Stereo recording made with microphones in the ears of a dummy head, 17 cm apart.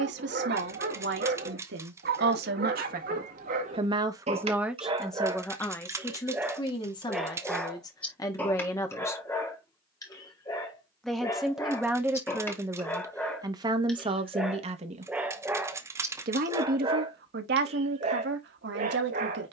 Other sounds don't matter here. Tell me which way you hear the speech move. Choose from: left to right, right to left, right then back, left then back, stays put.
left then back.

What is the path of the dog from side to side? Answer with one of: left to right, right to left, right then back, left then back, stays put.
left then back.